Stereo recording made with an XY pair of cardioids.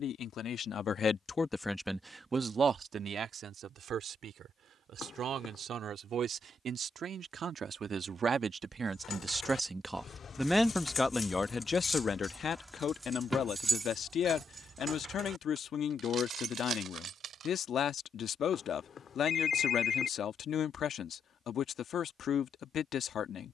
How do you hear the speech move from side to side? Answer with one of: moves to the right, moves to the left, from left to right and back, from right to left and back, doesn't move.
from left to right and back.